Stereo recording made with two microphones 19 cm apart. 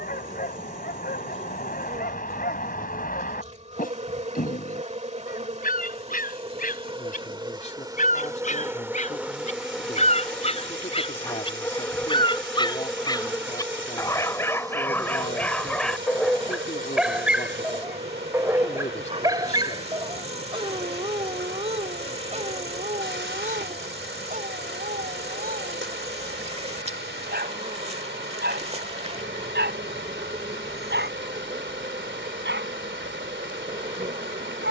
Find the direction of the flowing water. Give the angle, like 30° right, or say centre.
80° right.